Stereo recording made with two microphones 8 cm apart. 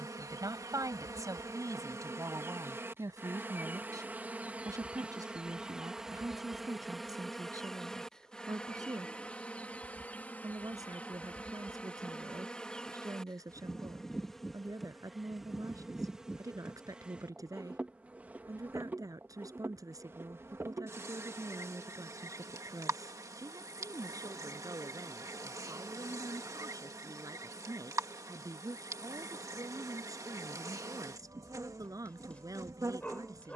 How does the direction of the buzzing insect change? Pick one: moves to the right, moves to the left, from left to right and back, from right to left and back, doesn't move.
from right to left and back.